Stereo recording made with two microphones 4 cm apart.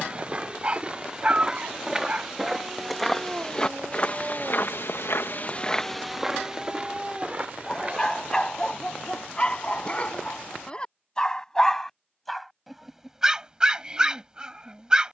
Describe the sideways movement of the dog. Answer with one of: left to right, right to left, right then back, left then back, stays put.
left then back.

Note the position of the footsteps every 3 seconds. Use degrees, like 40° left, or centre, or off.
20° right, 40° left, 20° right, off, off.